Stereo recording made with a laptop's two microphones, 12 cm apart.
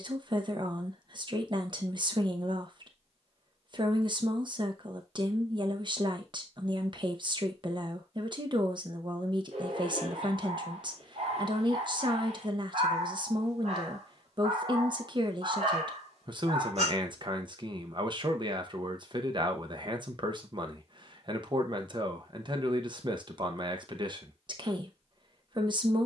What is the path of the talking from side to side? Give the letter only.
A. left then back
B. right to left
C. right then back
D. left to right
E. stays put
E.